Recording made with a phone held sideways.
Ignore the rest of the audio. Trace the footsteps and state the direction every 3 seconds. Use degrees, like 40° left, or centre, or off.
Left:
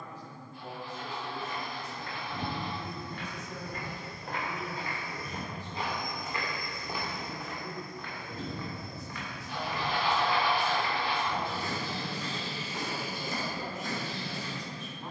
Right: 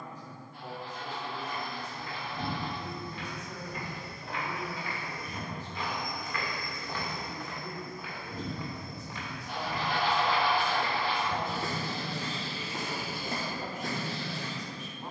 70° left, 50° left, centre, 40° right, 60° right.